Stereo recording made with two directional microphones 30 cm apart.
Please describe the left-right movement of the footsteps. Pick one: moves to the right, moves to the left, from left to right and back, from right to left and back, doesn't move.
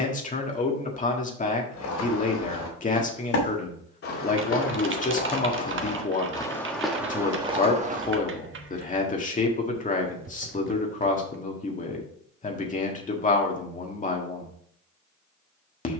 moves to the right.